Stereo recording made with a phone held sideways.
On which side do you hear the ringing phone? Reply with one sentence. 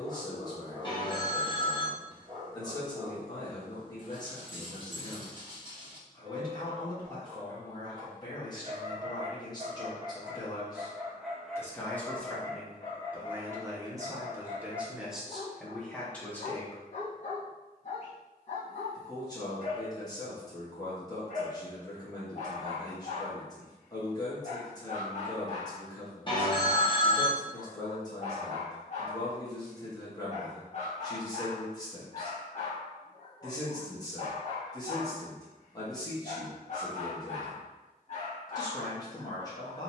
In this clip you hear the ringing phone on the left.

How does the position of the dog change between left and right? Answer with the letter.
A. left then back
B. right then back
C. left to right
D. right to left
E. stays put
D.